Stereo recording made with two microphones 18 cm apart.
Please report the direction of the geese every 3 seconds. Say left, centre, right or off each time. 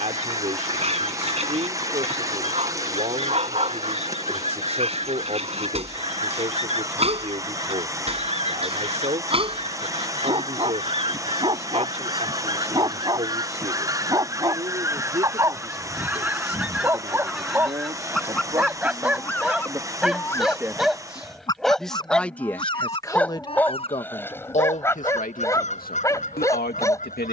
right, right, right, right, right, centre, centre, left, left.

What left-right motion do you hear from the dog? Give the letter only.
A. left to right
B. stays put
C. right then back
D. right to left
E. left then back
D.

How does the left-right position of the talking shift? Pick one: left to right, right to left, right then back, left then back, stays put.
right to left.